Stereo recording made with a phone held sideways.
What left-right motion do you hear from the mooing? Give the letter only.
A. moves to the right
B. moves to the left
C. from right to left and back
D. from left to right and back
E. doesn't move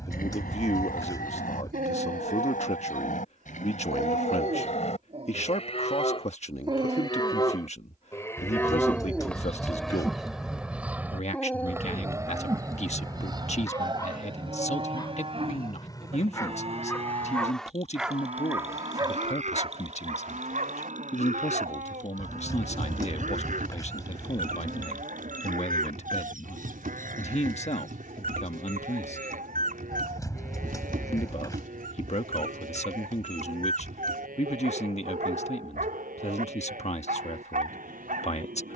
A.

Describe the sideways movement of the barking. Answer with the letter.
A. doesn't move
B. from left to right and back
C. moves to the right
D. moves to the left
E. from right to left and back
E.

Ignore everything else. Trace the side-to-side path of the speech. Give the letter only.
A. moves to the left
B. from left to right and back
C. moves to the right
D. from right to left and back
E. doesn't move
E.